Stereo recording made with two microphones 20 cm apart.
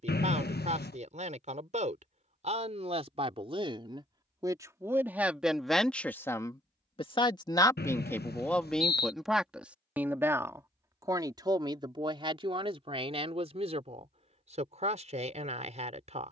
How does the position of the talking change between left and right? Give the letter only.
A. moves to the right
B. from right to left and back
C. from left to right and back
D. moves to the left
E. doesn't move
B.